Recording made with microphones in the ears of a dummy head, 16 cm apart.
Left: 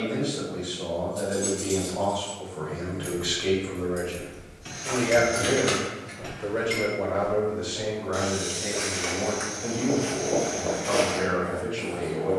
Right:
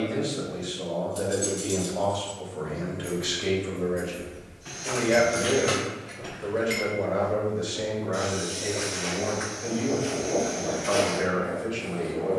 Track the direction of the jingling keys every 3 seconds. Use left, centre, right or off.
centre, left, centre, off.